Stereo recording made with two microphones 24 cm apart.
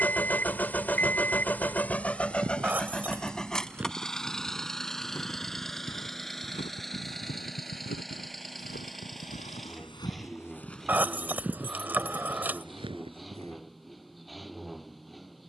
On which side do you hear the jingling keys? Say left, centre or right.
centre.